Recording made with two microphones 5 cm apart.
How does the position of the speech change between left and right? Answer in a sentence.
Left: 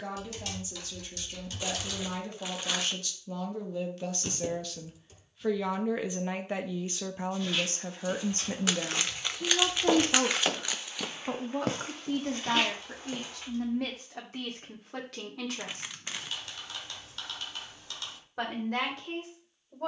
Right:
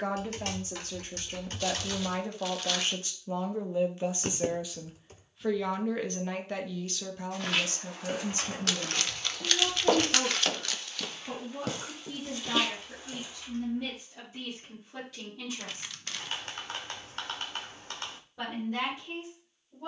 In this clip you hear the speech travel towards the left.